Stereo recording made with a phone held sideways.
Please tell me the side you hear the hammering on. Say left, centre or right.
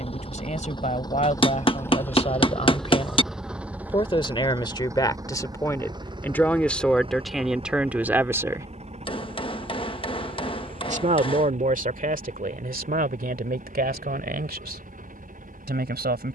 left.